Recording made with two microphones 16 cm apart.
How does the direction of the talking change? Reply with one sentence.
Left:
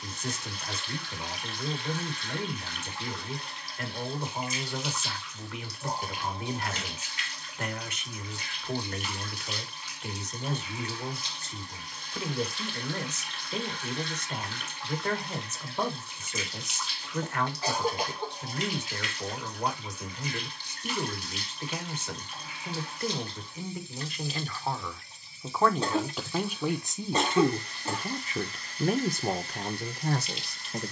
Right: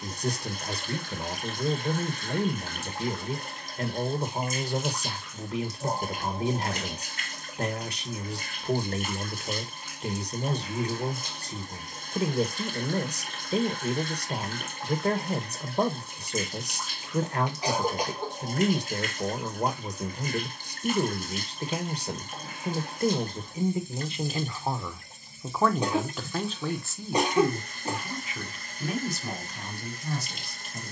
In this clip you hear the talking move to the left.